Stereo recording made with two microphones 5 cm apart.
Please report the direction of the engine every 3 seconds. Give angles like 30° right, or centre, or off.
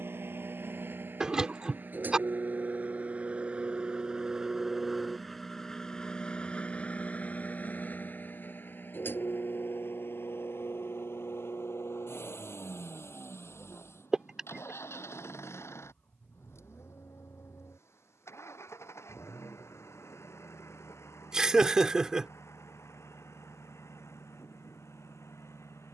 40° right, 10° right, 30° left, 60° left, 70° left, 70° left, 80° left, 80° left, 80° left.